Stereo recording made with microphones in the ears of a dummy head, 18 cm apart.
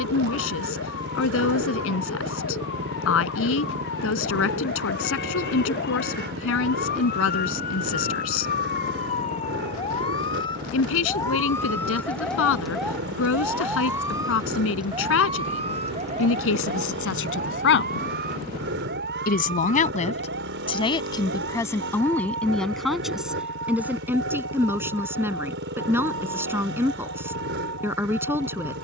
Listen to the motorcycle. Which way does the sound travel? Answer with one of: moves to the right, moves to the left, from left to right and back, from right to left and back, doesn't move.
doesn't move.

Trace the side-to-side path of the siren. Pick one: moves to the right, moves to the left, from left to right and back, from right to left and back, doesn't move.
moves to the right.